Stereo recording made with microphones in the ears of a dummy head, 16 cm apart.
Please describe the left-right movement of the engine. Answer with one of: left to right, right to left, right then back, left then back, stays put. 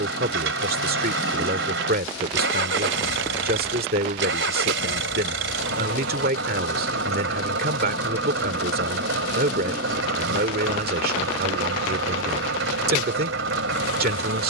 stays put.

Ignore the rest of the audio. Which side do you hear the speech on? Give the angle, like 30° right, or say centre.
60° right.